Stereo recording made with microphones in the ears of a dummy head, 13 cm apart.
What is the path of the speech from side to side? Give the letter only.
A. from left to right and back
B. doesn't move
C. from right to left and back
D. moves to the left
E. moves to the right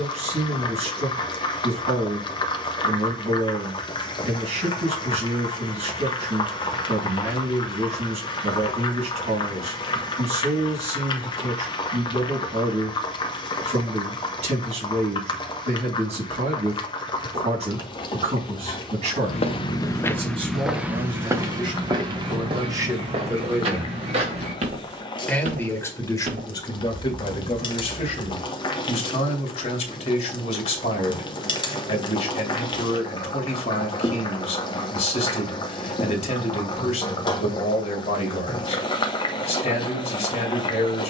D.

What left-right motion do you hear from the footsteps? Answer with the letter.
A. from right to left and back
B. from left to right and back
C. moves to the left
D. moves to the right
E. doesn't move
D.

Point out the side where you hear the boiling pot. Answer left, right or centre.
left.